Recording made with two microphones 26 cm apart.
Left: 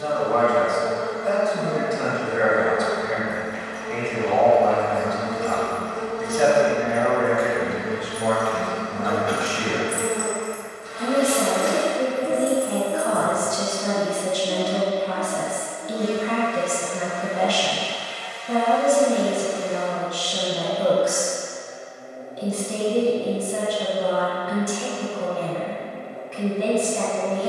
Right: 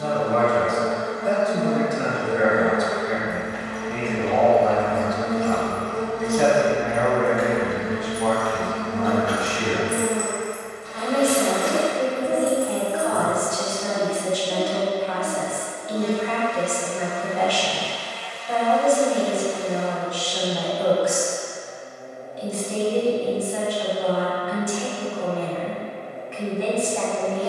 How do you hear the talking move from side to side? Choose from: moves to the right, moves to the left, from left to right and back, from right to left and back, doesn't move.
moves to the left.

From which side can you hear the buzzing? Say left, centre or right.
left.